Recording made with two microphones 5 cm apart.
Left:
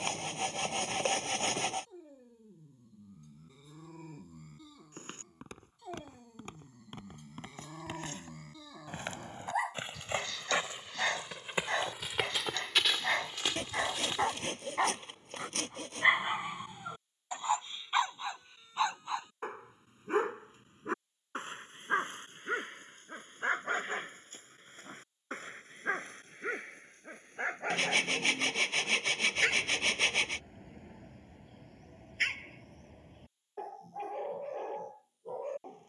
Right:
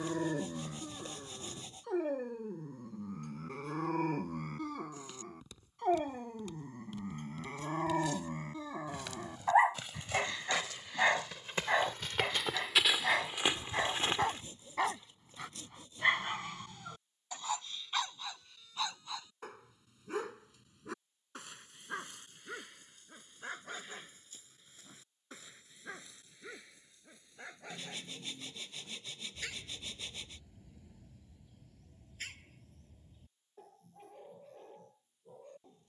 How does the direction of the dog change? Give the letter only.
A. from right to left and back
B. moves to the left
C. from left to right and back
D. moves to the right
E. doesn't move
B.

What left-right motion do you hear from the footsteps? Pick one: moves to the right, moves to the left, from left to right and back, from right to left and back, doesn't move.
moves to the right.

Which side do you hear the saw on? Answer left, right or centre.
left.